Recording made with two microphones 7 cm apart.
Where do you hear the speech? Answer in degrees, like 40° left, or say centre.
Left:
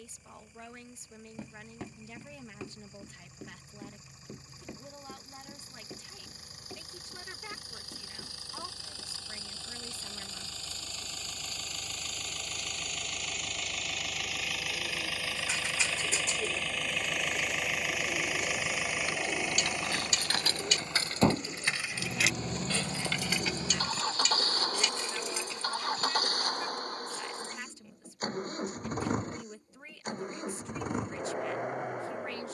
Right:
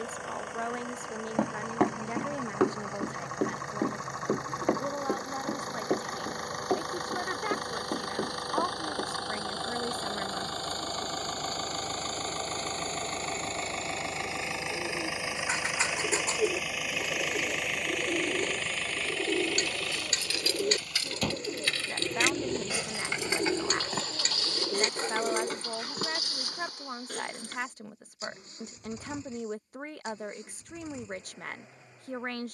50° right.